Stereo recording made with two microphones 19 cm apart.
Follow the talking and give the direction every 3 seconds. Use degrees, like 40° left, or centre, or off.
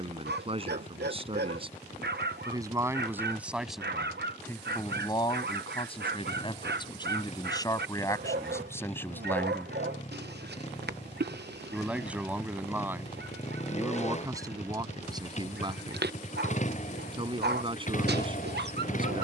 30° right, 10° left, 20° left, centre, 10° right, 30° right, 30° right.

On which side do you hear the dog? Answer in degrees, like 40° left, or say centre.
60° right.